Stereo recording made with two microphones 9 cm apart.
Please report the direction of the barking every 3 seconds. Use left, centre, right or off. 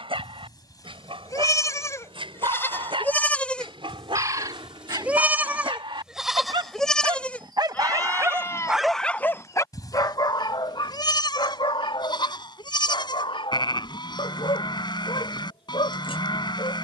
right, right, right, left, left, left.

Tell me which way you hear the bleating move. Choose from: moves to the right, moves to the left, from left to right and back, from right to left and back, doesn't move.
from left to right and back.